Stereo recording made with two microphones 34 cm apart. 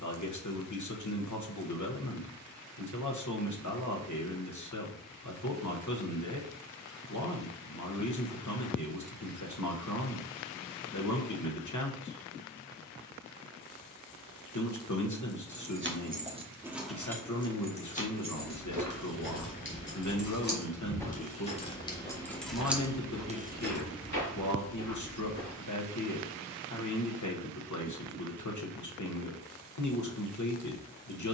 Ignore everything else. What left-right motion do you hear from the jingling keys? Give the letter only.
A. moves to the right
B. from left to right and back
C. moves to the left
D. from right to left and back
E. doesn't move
D.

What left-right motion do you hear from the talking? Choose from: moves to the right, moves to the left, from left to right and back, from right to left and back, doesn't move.
doesn't move.